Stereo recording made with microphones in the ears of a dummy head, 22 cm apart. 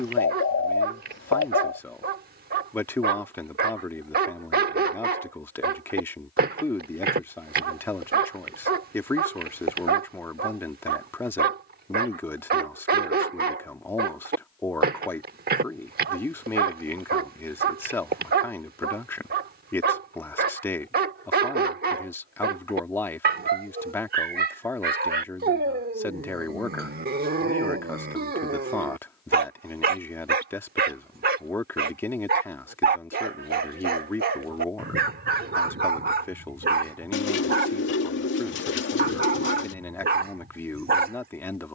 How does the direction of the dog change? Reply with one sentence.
In this clip you hear the dog stay put.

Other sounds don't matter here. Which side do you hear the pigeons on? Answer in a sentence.
In this clip you hear the pigeons on the left.